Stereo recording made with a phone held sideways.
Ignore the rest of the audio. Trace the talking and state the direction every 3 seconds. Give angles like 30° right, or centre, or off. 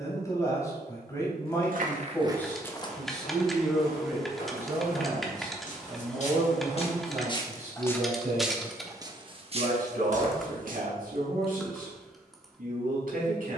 20° left, 10° right, 50° right, 70° right, 70° right.